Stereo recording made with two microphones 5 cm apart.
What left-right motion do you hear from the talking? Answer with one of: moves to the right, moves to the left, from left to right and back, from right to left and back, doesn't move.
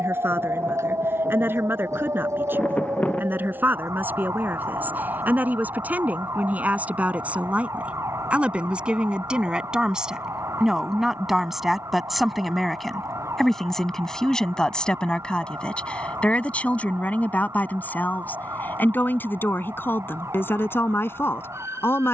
moves to the left.